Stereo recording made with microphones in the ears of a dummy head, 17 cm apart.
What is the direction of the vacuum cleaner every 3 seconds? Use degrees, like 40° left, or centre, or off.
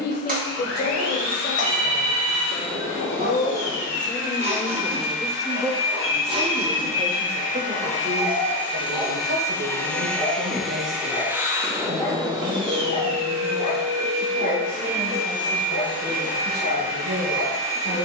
70° left, 60° left, 40° left, centre, 30° right, 50° right.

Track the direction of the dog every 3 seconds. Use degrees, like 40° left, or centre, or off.
50° right, 40° right, 20° right, 10° left, 40° left, 60° left.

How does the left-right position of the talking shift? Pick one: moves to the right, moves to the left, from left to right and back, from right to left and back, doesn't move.
moves to the right.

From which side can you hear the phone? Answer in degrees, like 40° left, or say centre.
40° right.